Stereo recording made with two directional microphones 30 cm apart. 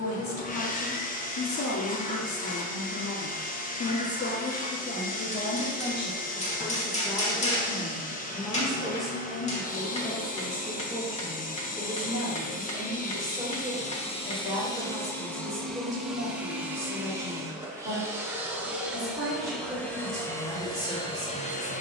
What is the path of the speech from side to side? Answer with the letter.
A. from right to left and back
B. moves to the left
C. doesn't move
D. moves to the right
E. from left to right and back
D.